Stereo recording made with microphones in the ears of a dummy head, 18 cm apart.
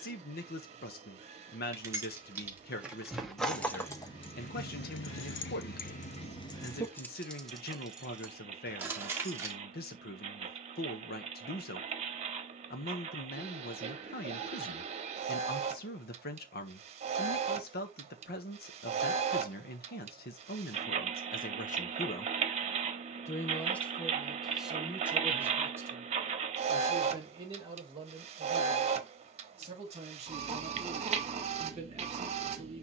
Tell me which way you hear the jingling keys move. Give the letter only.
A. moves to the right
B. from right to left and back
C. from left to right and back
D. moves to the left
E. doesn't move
B.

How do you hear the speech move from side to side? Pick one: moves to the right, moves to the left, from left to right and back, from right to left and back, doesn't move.
moves to the right.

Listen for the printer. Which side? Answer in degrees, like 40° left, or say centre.
30° right.